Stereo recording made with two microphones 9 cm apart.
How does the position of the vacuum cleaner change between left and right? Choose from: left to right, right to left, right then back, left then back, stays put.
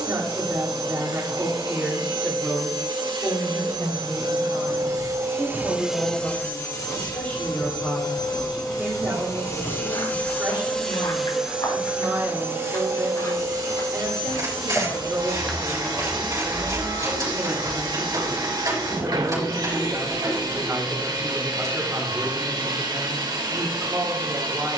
left then back.